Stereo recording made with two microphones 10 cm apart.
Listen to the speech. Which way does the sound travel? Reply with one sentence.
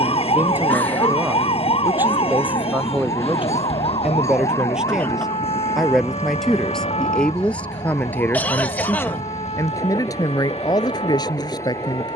In this clip you hear the speech go from the right side to the left.